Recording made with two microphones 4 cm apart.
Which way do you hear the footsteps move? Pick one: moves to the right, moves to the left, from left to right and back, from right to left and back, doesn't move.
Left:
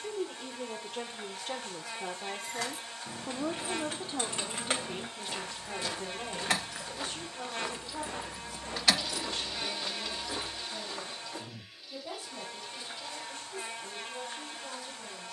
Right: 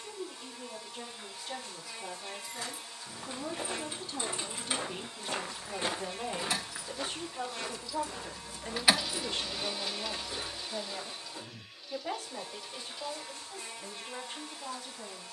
moves to the left.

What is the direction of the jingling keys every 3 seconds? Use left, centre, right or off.
left, left, left, right, off.